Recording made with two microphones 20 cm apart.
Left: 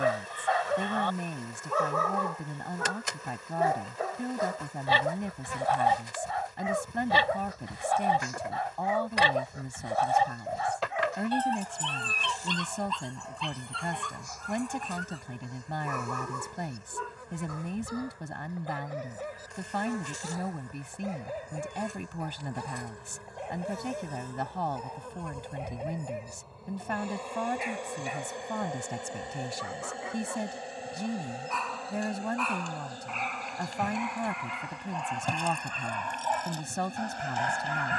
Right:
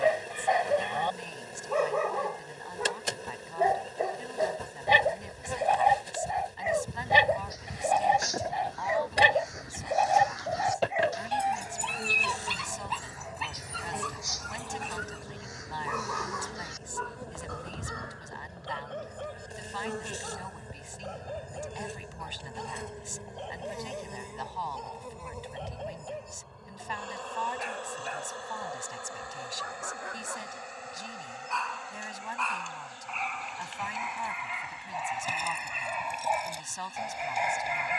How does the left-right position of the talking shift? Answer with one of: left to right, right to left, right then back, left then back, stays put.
stays put.